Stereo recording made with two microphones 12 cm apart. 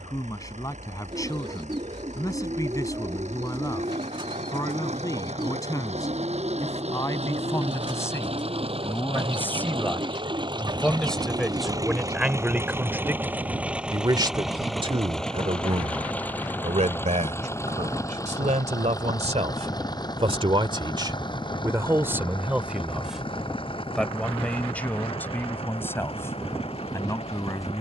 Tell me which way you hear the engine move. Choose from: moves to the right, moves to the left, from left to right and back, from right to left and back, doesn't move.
moves to the left.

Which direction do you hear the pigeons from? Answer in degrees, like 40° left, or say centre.
40° right.